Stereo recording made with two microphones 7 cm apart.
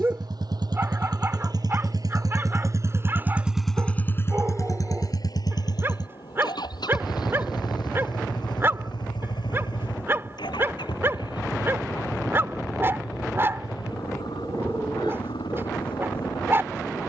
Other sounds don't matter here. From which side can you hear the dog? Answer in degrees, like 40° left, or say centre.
30° right.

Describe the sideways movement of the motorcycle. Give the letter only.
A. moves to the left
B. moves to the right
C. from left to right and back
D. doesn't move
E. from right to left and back
A.